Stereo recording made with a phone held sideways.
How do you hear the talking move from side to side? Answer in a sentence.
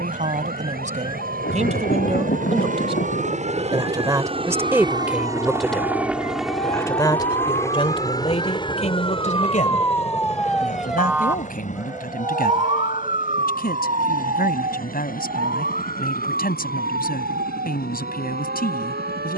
You can hear the talking move from right to left.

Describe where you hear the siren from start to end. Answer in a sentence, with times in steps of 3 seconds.
In this clip you hear the siren on the left from 0 s, in the centre from 9 s and on the right from 12 s.